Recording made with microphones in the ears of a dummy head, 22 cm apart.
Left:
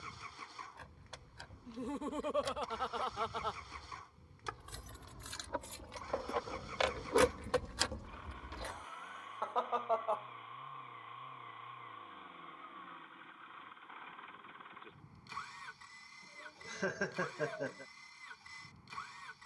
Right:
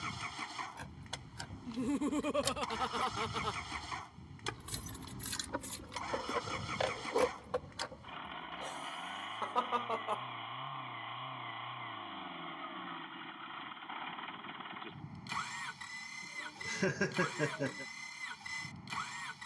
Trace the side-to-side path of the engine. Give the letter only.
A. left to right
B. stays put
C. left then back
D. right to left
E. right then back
B.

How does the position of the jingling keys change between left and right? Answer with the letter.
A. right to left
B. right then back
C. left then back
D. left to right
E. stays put
A.